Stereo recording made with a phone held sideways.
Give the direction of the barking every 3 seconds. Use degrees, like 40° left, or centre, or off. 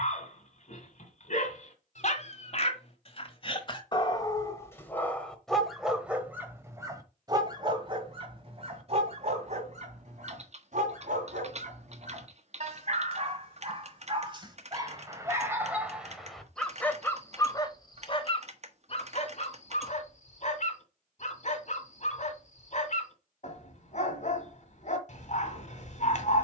50° left, 20° left, 30° right, 50° right, 40° right, centre, 50° left, 50° left, 50° left.